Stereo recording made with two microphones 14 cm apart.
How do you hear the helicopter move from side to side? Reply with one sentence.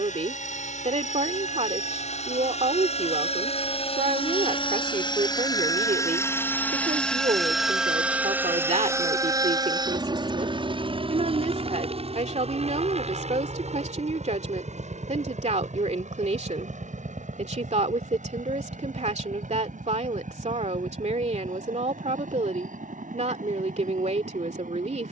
In this clip you hear the helicopter travel towards the right.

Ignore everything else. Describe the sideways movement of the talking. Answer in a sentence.
In this clip you hear the talking stay put.